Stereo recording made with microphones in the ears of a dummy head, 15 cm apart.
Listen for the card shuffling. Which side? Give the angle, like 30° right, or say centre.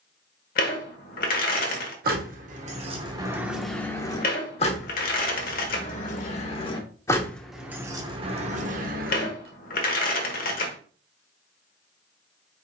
60° left.